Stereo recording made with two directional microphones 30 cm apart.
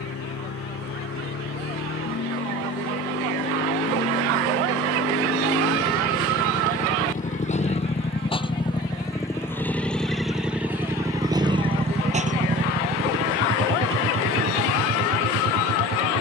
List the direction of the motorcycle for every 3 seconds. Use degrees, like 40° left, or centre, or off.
50° left, 40° left, 20° left, centre, 40° right, 60° right.